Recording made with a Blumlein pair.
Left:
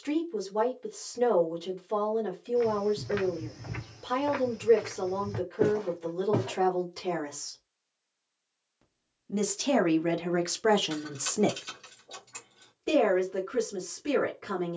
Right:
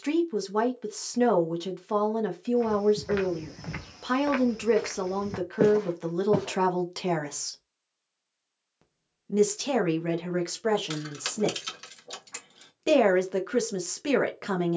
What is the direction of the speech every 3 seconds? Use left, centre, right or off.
right, right, right, centre, right.